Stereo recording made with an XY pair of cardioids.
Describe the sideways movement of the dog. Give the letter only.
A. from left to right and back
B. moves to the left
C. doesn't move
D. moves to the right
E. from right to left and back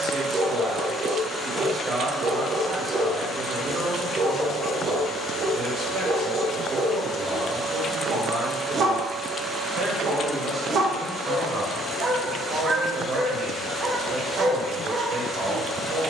C.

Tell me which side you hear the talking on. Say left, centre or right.
right.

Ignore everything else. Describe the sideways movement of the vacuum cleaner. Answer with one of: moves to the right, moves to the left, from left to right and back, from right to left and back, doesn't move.
from right to left and back.